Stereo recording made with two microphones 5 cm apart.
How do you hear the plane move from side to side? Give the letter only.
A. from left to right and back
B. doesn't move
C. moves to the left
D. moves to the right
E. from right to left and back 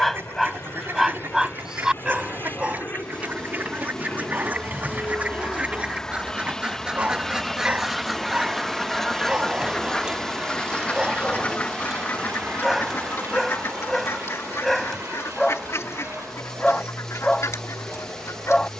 D.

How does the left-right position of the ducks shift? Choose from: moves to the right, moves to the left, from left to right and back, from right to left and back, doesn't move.
moves to the left.